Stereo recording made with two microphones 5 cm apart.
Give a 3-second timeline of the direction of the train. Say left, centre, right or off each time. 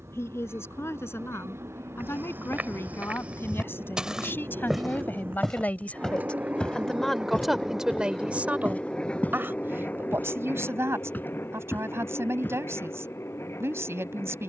right, right, centre, left, left.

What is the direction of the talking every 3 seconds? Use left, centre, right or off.
left, left, centre, right, right.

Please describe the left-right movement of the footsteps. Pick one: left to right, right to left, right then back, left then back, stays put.
right to left.